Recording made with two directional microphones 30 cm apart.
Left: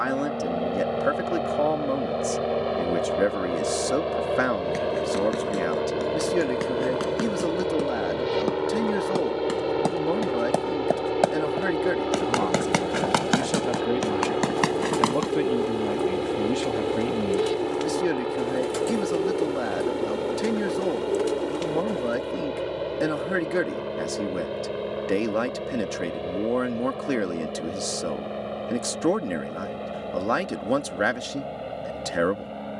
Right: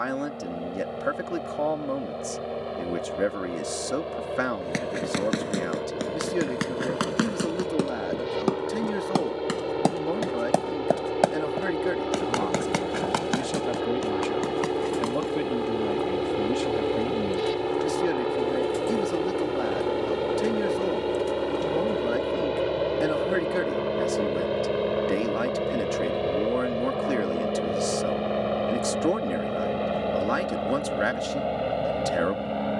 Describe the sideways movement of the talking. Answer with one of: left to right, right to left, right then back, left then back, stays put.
stays put.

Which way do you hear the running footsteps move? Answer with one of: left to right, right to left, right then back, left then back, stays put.
right to left.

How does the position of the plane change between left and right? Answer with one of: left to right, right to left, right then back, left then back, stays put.
left to right.